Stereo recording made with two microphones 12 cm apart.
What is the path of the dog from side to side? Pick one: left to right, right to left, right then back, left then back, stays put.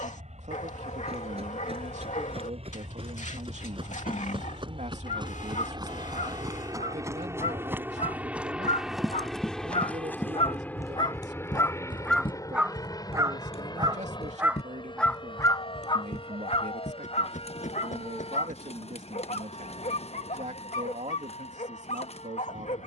right then back.